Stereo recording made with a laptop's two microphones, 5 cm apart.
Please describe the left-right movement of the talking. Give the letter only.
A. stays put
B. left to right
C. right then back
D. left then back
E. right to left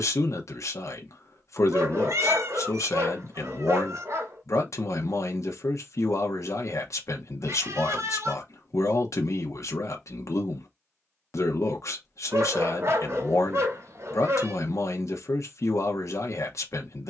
A.